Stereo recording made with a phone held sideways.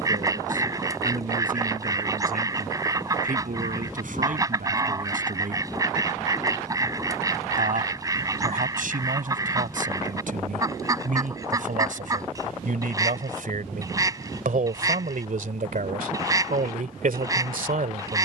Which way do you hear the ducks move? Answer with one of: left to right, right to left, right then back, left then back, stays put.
stays put.